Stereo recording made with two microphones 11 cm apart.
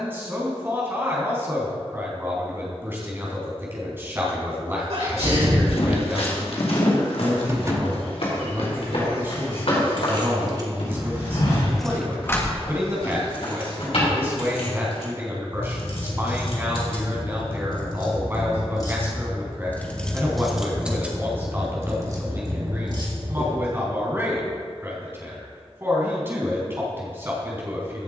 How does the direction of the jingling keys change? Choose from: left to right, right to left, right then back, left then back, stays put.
left then back.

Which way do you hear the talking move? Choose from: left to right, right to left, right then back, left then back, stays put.
stays put.